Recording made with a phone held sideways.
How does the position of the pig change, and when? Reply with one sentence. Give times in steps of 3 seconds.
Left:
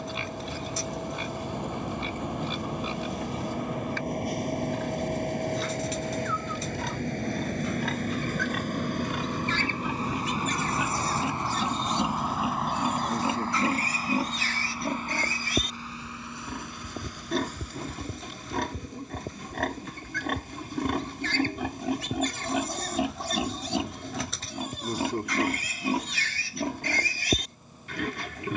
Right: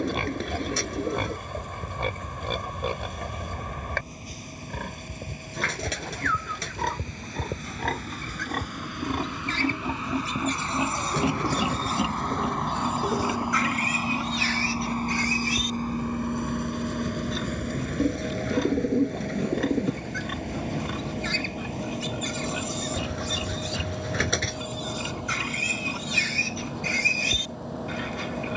In this clip you hear the pig on the right from 0 s and on the left from 12 s.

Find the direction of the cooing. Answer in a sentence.
In this clip you hear the cooing on the right.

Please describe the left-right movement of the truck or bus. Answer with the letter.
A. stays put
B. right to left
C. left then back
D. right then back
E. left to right
E.